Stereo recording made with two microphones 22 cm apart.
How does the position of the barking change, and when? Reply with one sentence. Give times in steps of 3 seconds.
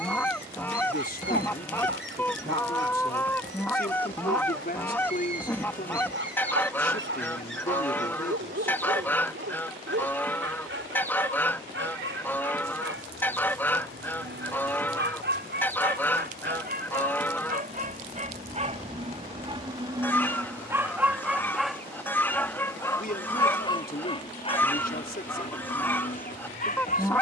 You can hear the barking on the right from 0 s, in the centre from 21 s and on the left from 24 s.